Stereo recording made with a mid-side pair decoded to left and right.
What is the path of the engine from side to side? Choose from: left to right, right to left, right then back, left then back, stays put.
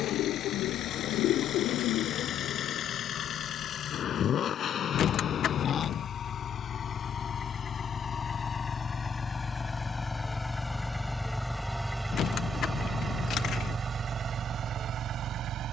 left to right.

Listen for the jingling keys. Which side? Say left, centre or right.
left.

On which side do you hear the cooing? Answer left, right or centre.
left.